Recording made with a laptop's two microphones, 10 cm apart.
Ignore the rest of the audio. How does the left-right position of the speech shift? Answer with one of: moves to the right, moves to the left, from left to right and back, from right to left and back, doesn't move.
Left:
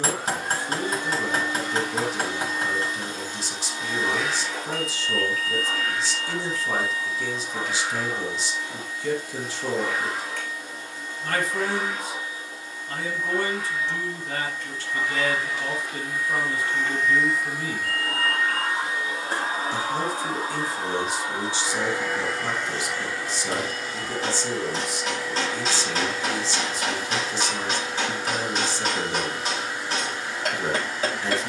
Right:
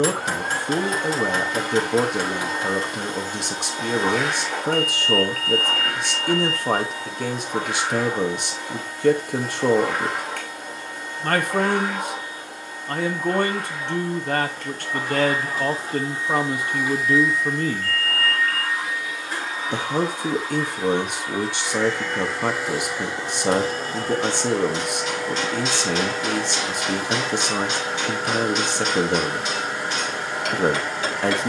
doesn't move.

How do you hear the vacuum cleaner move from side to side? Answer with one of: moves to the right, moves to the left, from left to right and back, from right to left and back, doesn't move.
from right to left and back.